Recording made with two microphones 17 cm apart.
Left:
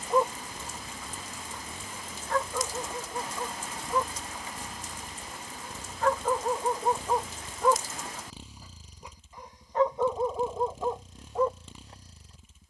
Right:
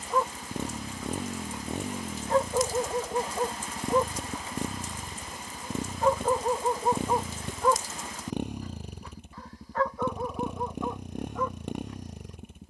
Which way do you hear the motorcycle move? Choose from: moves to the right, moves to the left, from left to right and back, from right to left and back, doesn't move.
doesn't move.